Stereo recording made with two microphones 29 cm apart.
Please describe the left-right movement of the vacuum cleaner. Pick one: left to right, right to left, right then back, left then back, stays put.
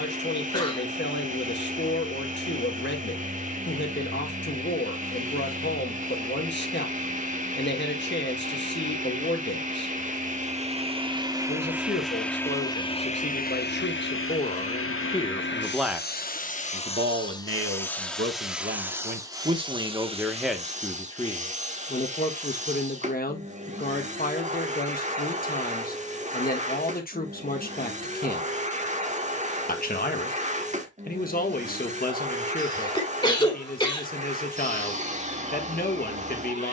left then back.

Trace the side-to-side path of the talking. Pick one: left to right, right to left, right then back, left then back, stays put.
right then back.